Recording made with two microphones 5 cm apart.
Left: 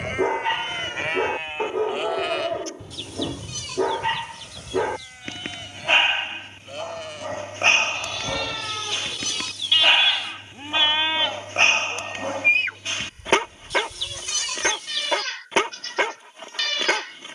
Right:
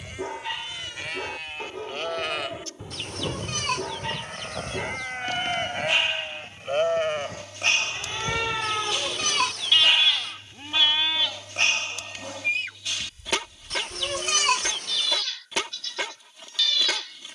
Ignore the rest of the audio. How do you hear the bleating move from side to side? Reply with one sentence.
You can hear the bleating go right and come back.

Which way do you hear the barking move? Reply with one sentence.
You can hear the barking stay in one place.